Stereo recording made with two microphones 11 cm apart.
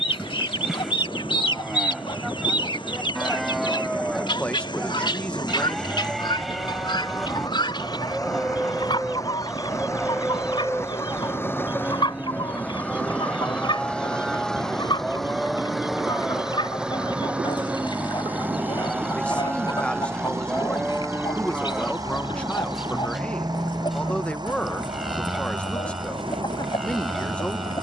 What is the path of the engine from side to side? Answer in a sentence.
You can hear the engine go from the left side to the right.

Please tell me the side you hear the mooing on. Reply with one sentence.
You can hear the mooing in the centre.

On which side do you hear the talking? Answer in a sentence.
In this clip you hear the talking in the centre.